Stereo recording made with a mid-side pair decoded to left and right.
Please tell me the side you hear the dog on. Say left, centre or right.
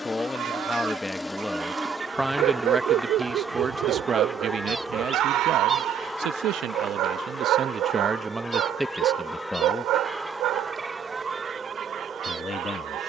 right.